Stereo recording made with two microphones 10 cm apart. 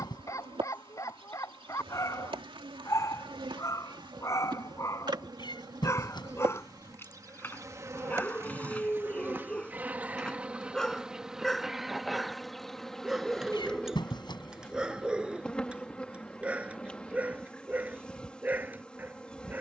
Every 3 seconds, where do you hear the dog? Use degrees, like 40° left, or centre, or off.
30° left, 30° left, 20° left, 10° left, 10° right, 10° right, 20° right.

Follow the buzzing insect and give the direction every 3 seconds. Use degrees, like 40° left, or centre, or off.
60° right, 50° right, 30° right, 10° right, 10° left, 10° left, 10° left.